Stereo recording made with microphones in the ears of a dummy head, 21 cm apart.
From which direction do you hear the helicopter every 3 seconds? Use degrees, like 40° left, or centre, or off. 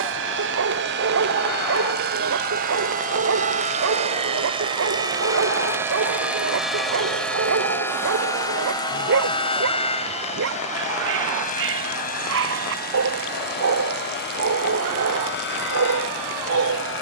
50° right, 20° right, 10° left, 30° left, 40° left, 50° left.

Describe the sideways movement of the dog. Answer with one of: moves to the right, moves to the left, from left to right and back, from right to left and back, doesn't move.
doesn't move.